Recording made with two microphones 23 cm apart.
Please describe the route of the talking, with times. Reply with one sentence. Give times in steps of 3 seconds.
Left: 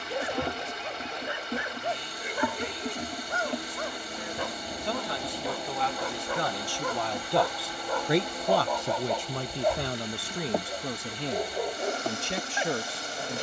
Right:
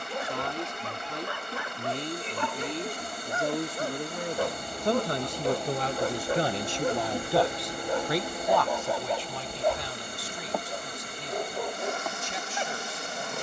You can hear the talking on the right from 0 s, in the centre from 6 s and on the left from 9 s.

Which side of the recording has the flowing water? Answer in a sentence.
You can hear the flowing water on the right.